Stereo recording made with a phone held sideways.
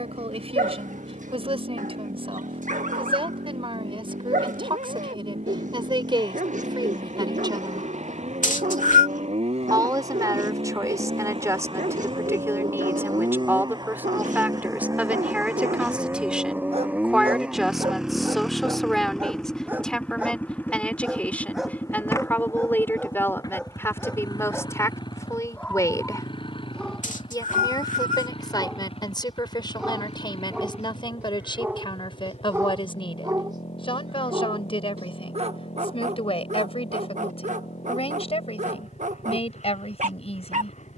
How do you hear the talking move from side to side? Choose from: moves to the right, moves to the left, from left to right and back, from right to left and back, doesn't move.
moves to the left.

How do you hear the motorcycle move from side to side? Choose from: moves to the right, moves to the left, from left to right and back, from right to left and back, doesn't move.
moves to the left.